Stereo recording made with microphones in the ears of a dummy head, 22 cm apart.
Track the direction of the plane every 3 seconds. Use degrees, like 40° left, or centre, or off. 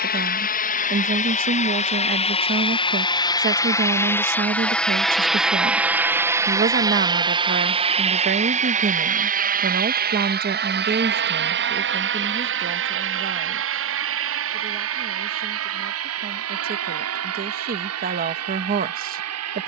30° left, 10° left, 20° right, 40° right, 50° right, 60° right, 70° right.